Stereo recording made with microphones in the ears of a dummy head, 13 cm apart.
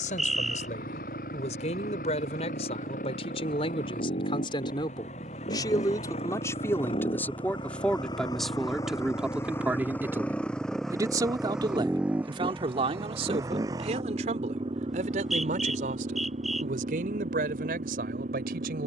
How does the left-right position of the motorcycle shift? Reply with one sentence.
In this clip you hear the motorcycle go from the left side to the right.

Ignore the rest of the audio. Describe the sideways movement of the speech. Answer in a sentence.
In this clip you hear the speech move to the right.